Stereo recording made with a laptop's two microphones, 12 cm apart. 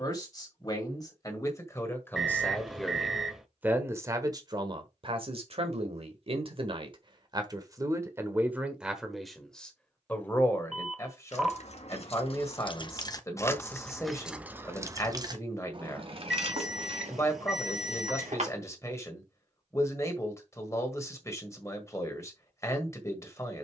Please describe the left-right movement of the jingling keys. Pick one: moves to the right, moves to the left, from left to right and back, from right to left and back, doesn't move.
moves to the right.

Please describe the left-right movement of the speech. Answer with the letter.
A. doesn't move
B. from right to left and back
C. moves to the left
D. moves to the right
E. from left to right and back
E.